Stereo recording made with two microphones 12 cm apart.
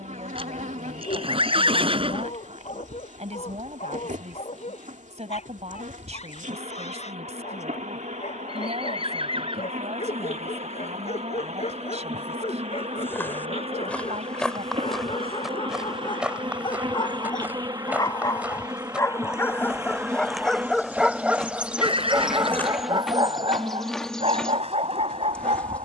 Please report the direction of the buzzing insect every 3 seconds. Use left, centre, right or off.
right, right, right, right, right, right, right, centre, centre.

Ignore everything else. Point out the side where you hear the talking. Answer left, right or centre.
right.